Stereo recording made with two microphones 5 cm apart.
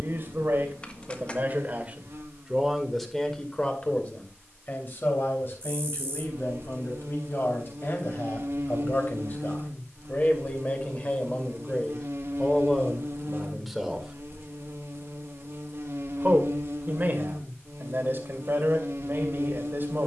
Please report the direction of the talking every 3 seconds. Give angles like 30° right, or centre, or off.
30° right, 30° left, 50° left, 30° left, 10° left, 40° right, 50° right.